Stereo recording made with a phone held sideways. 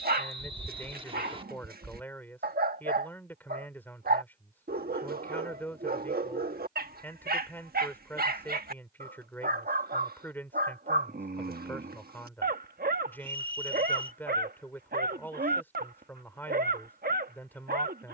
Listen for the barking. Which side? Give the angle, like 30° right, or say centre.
80° right.